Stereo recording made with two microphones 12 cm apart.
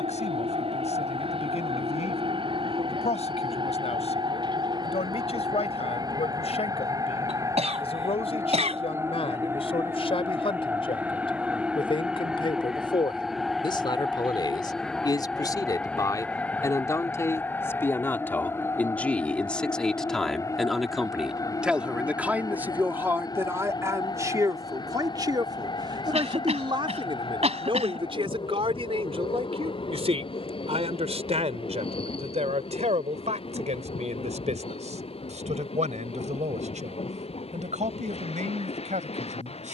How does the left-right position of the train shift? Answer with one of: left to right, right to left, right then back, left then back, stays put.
right to left.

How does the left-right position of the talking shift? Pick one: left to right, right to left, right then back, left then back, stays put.
left to right.